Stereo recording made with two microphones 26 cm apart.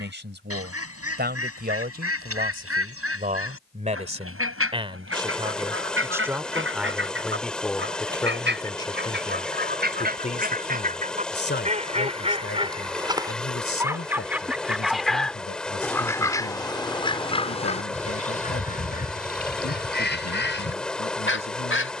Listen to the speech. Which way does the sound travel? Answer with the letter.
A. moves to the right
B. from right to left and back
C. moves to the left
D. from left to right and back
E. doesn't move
C.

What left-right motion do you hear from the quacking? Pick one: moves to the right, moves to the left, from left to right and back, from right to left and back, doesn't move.
moves to the left.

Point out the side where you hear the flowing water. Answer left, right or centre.
centre.